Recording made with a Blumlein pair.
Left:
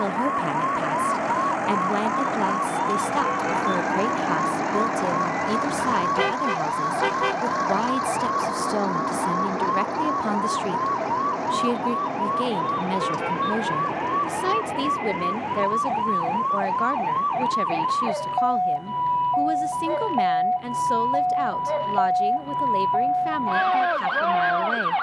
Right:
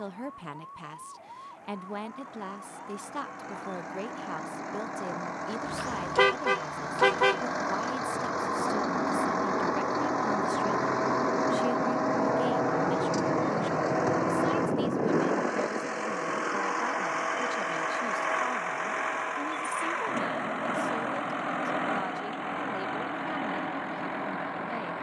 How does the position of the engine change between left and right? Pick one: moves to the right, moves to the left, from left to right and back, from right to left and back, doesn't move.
moves to the right.